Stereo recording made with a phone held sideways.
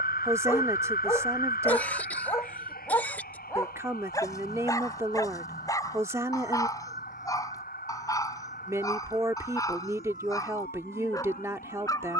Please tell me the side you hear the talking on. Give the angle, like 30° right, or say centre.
20° right.